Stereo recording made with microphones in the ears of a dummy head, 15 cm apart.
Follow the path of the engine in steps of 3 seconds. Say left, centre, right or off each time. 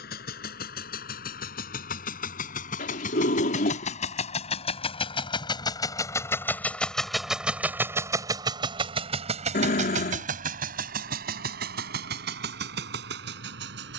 left, left, centre, right, right.